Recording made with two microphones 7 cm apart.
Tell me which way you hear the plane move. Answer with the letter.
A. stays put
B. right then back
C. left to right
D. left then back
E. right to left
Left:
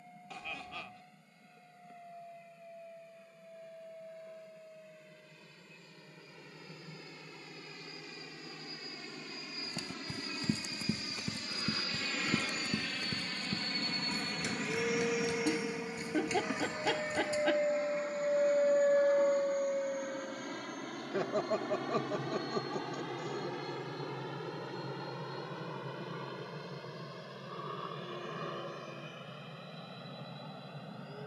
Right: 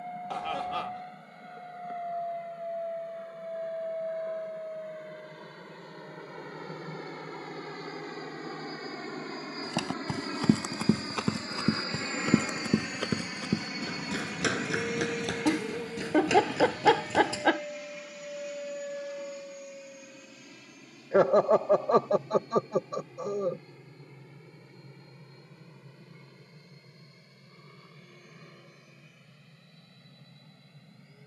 E.